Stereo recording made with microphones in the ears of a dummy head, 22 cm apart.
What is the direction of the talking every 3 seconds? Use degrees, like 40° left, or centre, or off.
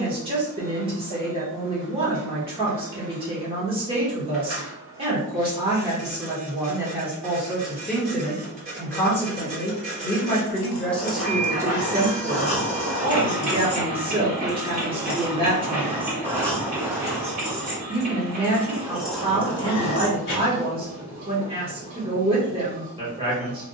20° right, 20° right, centre, 10° left, 20° right, 20° right, 20° right, 20° right.